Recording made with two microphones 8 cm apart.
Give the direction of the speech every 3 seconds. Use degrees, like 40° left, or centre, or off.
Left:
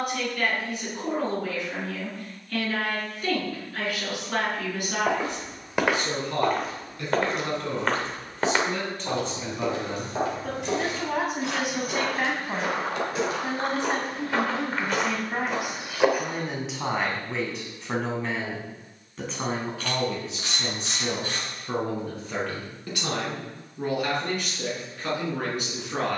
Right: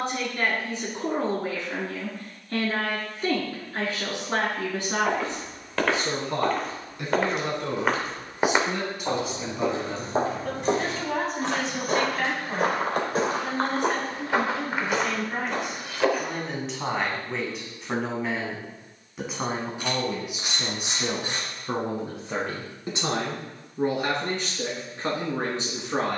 30° right, 30° right, 20° right, centre, 20° left, centre, 10° right, 20° right, 30° right.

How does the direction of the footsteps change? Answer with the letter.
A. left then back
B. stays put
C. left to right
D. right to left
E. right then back
E.